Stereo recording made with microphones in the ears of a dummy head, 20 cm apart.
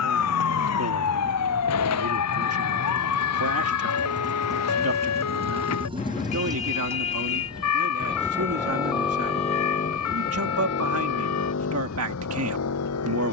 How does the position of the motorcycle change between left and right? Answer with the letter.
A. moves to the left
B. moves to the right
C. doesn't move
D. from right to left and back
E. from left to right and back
A.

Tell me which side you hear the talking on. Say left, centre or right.
right.